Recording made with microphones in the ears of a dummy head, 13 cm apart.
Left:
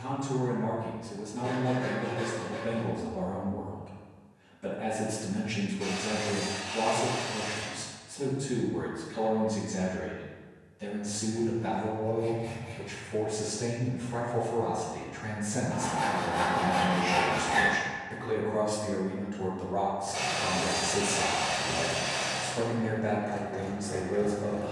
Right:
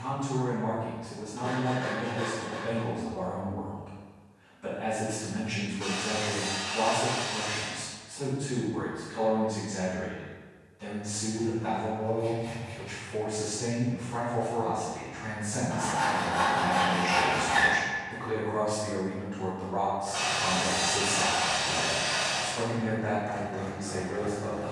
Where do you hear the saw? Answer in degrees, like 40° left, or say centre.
10° left.